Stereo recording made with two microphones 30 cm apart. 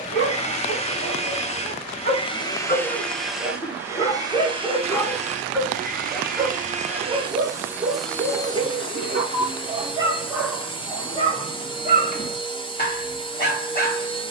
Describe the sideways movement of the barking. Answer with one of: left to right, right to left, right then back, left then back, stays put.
right then back.